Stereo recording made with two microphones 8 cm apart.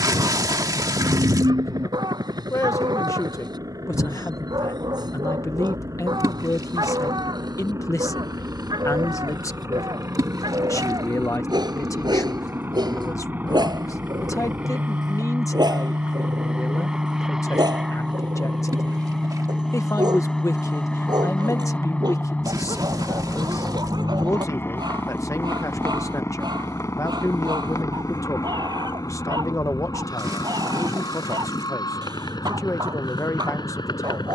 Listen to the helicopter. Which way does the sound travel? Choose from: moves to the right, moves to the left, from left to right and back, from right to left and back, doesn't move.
moves to the left.